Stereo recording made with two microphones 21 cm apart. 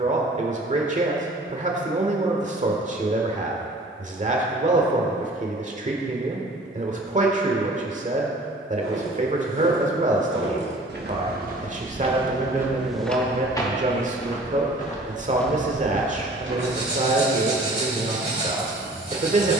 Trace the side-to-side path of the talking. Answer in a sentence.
You can hear the talking stay put.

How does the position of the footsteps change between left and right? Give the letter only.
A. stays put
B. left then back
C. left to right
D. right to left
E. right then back
B.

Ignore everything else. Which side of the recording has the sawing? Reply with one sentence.
In this clip you hear the sawing on the right.